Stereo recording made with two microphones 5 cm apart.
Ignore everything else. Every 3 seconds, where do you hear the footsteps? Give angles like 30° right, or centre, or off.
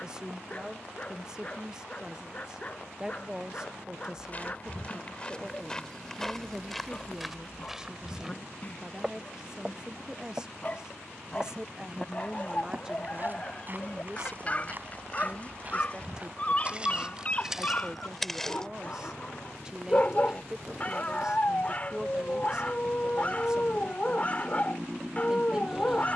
off, 20° left, centre, 20° right, 40° right, 20° right, 10° left, off, off.